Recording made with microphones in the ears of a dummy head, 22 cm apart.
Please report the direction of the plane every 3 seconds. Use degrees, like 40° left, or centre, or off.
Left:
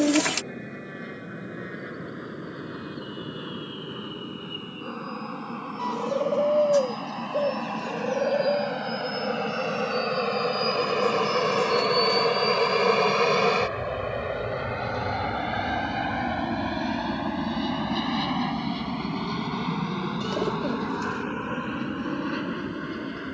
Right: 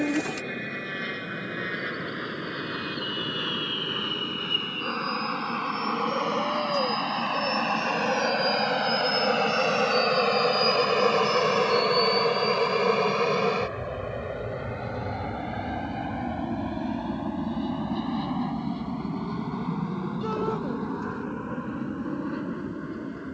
70° right, 60° right, 50° right, 20° right, 20° left, 50° left, 70° left, 70° left.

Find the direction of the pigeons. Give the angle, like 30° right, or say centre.
60° left.